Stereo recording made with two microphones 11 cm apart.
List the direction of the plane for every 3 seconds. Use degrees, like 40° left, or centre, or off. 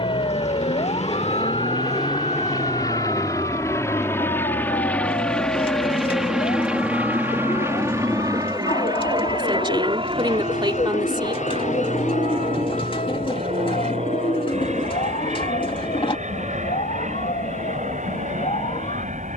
40° left, 20° left, 20° right, 50° right, 60° right, 70° right, 70° right.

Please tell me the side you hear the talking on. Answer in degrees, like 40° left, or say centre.
40° right.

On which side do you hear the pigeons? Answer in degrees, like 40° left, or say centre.
50° left.